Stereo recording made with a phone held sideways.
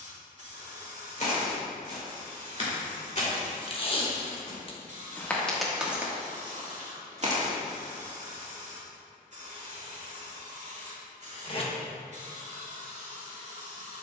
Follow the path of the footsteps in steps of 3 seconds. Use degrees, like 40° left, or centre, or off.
50° left, 20° left, 40° right, off, off.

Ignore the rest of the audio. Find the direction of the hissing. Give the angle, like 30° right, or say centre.
50° right.